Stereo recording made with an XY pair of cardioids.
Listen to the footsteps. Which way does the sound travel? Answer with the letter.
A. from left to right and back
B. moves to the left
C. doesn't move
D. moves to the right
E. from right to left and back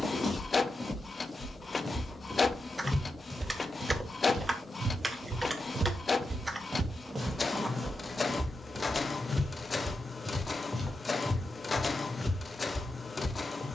A.